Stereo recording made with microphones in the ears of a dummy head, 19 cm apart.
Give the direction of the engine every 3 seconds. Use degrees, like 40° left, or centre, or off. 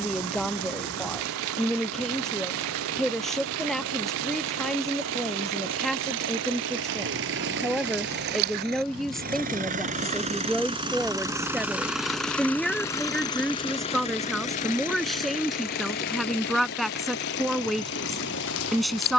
80° right, 70° right, 60° right, 30° right, 20° left, 50° left, 60° left.